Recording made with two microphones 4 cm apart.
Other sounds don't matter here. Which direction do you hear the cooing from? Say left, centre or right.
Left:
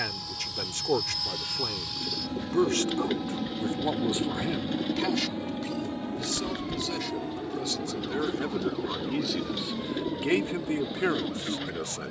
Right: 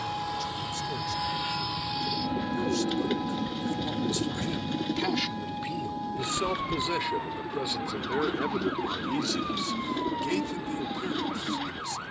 centre.